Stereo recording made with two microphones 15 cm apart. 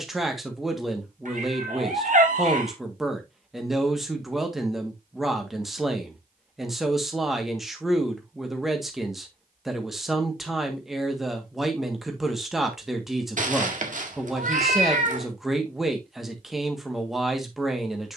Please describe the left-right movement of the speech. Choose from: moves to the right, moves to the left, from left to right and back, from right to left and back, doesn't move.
doesn't move.